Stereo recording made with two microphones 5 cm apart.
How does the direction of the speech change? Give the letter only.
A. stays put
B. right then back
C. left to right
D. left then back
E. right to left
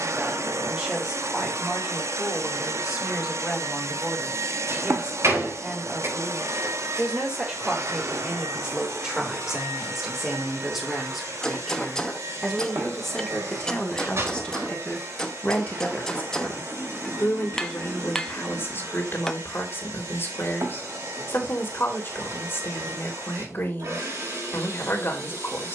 E.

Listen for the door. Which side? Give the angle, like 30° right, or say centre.
70° right.